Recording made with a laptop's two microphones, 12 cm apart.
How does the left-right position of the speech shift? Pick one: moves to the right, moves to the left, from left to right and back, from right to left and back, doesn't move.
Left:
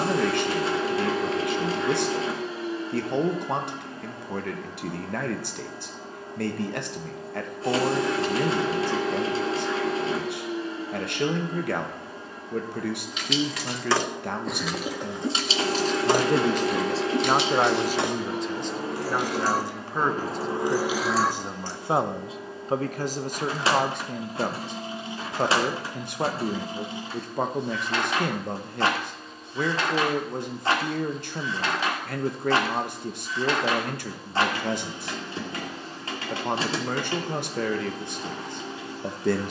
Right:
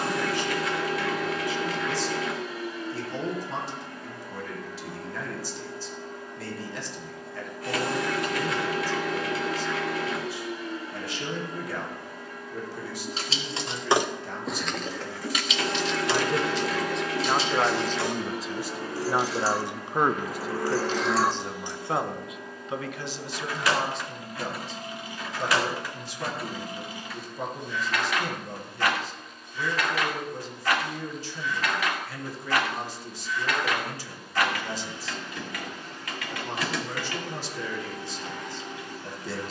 from left to right and back.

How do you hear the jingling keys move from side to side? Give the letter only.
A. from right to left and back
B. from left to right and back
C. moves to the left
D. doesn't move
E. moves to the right
A.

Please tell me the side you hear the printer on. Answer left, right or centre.
left.